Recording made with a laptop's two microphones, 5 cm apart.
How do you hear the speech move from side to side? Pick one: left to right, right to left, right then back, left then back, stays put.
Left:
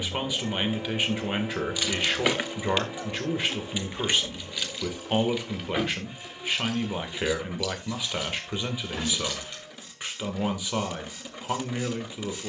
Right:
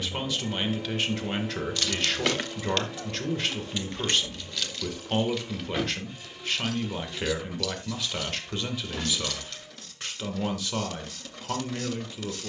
stays put.